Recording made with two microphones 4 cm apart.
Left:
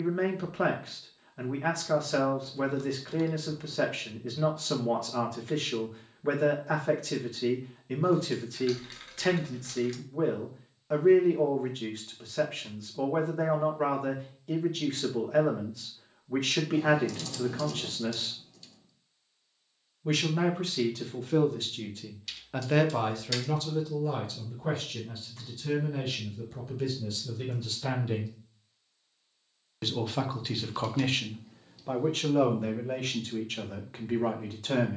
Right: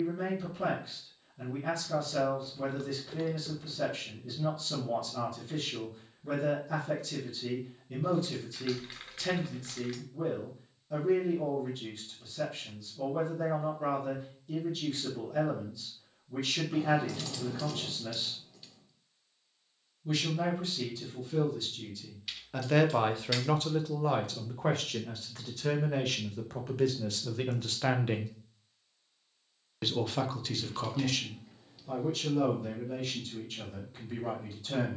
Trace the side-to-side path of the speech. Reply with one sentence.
You can hear the speech move from left to right and back again.